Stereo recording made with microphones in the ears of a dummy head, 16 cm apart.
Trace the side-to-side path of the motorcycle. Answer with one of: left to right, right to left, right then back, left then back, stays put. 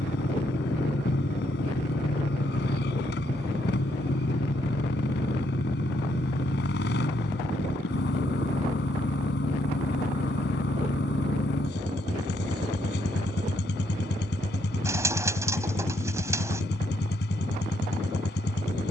stays put.